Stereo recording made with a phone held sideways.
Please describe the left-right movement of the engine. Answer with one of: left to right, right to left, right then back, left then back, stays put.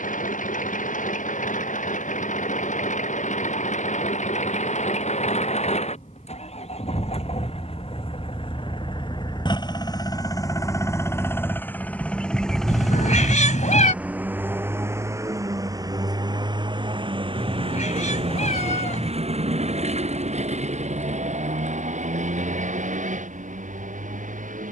left to right.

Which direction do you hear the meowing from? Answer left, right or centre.
left.